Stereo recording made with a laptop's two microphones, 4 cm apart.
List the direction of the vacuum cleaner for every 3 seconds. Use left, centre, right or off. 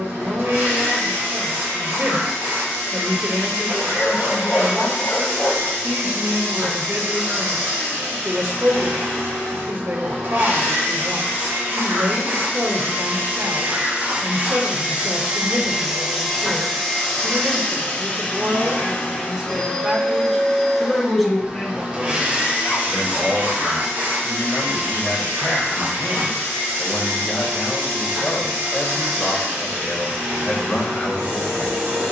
right, right, right, right, right, centre, left, right, right, right, right.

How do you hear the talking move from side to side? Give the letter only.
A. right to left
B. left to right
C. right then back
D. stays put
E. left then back
A.